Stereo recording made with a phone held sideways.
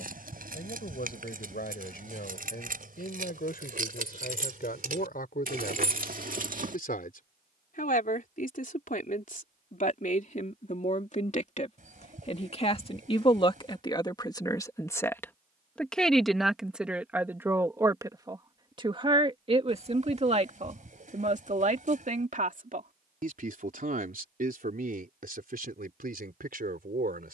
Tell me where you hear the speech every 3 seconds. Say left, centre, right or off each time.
left, left, left, left, left, centre, right, right, right.